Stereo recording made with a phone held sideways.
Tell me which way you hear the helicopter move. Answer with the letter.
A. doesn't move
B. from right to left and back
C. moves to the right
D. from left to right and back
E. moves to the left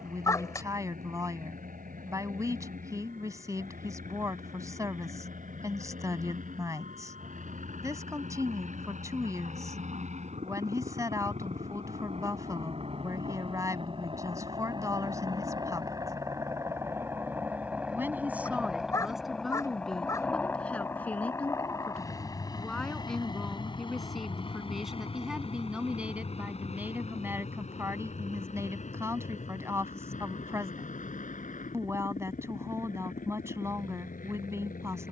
E.